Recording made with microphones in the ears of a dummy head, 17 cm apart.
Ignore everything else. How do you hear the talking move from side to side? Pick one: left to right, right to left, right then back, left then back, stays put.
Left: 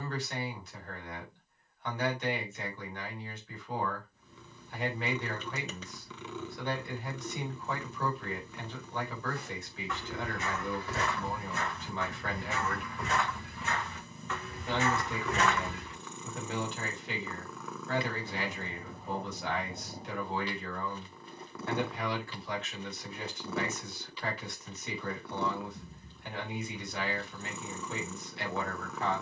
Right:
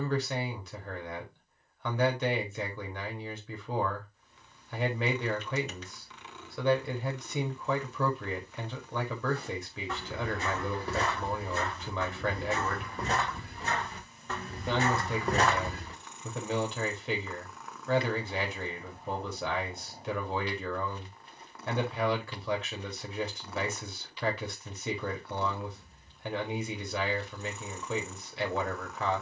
stays put.